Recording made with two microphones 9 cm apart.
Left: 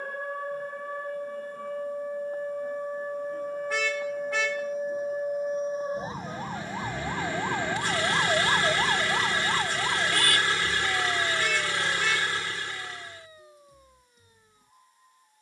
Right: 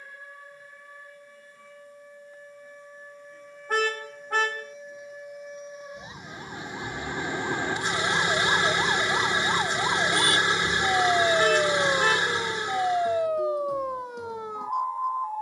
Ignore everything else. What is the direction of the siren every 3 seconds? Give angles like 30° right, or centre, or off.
50° left, 50° left, 20° left, 30° right, 70° right.